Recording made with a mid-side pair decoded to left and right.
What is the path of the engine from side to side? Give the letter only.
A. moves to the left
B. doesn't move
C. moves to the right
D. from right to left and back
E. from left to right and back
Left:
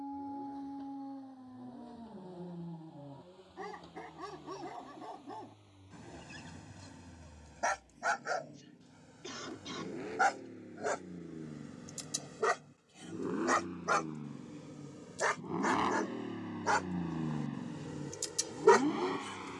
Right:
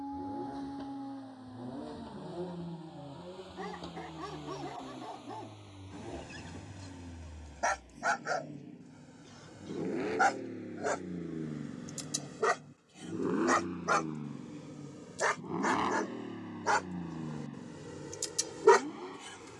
A.